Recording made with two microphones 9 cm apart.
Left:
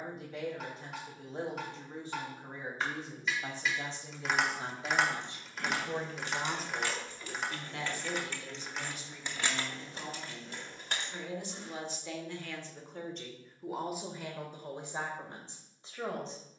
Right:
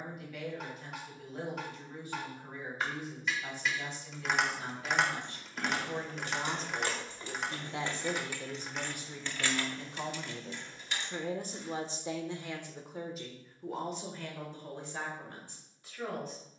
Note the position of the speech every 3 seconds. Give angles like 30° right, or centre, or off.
30° left, 30° left, 20° right, 50° right, centre, 20° left.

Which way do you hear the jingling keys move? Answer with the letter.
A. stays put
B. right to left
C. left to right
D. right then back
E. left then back
B.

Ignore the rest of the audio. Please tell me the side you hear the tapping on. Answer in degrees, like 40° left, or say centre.
centre.